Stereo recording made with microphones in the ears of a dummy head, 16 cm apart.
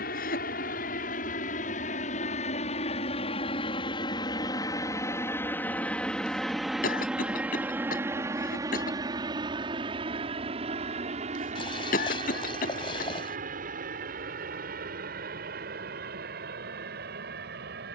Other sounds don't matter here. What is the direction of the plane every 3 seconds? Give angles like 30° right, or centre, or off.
50° left, 20° left, 10° right, 30° right, 40° right, 50° right.